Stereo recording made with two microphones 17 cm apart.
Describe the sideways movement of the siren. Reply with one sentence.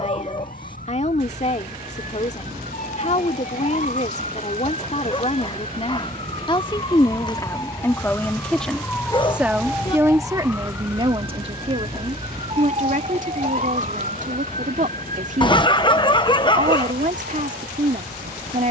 You can hear the siren travel towards the right.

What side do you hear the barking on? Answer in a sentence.
You can hear the barking on the left.